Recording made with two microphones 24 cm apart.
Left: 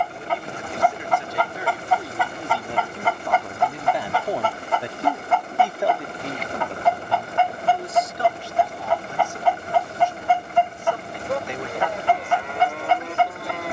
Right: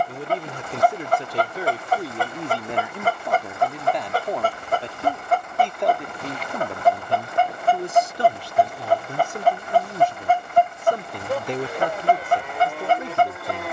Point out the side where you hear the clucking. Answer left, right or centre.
right.